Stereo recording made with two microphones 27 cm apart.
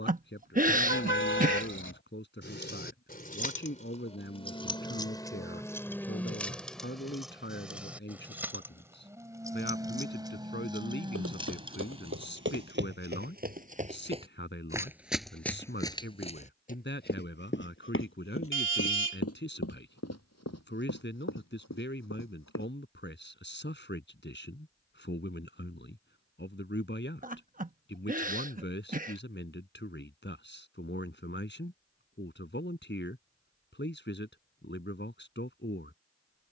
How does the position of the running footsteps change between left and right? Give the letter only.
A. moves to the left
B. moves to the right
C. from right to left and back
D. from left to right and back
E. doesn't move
A.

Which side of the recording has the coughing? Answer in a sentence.
In this clip you hear the coughing on the right.